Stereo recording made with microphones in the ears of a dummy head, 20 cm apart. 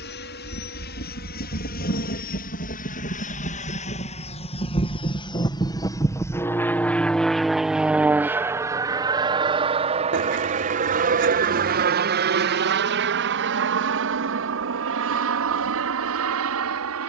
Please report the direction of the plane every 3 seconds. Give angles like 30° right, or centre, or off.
50° left, 30° left, centre, 30° right, 50° right, 60° right.